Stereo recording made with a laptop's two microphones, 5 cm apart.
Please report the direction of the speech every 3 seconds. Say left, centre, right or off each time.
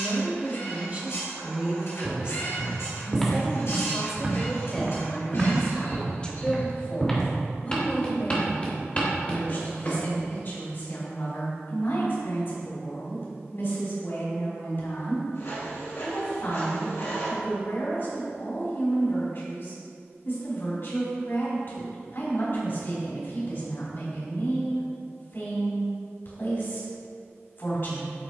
right, centre, left, left, left, left, left, left, left, left.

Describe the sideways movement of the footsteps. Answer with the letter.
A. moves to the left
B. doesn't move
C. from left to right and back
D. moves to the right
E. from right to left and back
C.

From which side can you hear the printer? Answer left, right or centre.
left.